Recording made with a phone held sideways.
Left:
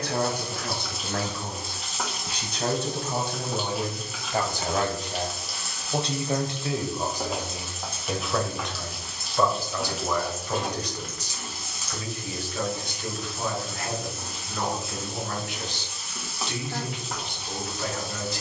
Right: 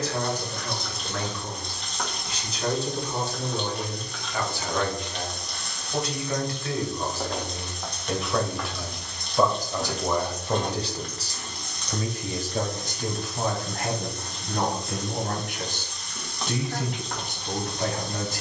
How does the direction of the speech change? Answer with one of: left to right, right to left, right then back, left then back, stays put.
left to right.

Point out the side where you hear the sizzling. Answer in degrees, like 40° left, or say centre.
10° left.